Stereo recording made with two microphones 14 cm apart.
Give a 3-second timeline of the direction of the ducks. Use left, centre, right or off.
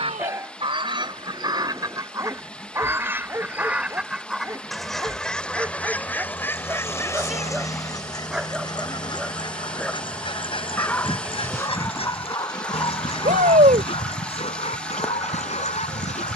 right, centre, left, left, left, left.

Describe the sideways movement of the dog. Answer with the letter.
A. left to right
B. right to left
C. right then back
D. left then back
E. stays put
B.